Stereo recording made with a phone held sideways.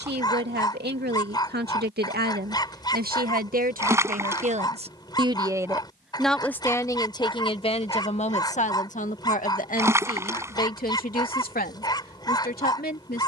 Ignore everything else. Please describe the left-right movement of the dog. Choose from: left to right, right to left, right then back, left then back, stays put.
stays put.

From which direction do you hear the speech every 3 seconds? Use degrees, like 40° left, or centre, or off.
80° right, 50° right, 30° left, 60° left, 60° left.